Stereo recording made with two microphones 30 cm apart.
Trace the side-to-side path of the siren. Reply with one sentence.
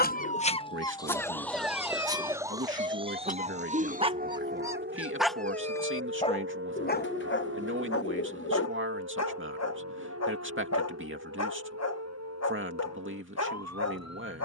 In this clip you hear the siren go from the left side to the right.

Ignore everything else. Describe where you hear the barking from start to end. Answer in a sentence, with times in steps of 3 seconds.
In this clip you hear the barking in the centre from 0 s and on the left from 6 s.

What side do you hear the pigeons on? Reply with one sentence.
In this clip you hear the pigeons on the left.